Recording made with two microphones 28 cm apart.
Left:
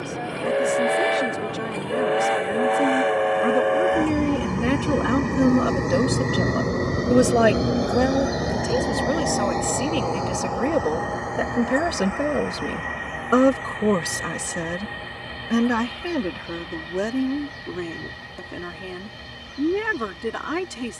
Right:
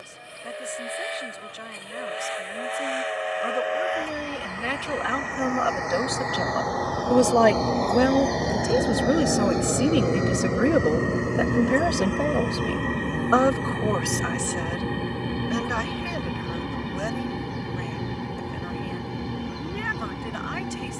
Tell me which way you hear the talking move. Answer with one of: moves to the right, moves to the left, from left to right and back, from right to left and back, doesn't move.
from left to right and back.